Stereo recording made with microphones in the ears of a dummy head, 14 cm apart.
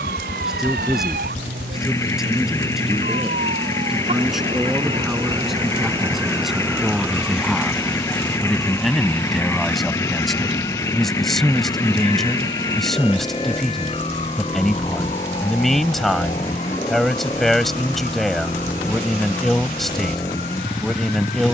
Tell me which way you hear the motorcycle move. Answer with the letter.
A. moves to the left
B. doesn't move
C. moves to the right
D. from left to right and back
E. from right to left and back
B.